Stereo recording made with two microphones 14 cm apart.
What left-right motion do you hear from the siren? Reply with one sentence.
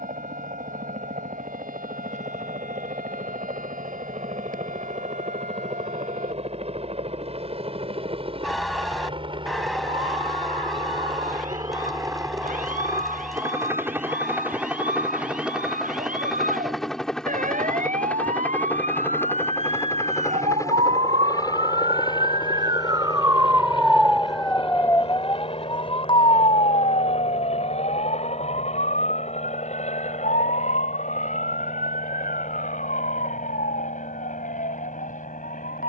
In this clip you hear the siren travel towards the left.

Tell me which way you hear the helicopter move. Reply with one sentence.
You can hear the helicopter move from right to left.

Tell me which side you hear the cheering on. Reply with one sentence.
You can hear the cheering in the centre.